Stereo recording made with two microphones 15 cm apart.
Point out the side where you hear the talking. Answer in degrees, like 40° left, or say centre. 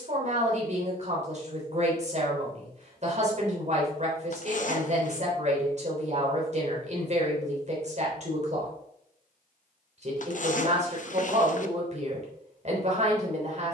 50° right.